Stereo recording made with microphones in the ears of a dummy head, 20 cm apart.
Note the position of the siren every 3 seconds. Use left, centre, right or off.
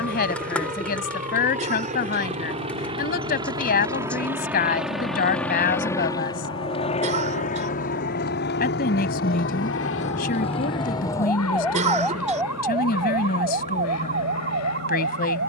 left, left, left, left, right.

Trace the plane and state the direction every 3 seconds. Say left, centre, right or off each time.
right, centre, left, left, left.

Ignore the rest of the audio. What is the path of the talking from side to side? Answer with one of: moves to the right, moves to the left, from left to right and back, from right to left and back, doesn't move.
doesn't move.